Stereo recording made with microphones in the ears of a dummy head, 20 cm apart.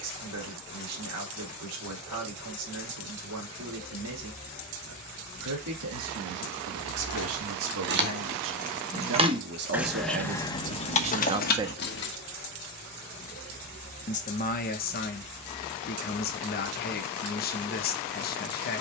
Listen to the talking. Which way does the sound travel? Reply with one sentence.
In this clip you hear the talking travel towards the left.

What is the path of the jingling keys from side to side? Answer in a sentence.
You can hear the jingling keys travel towards the left.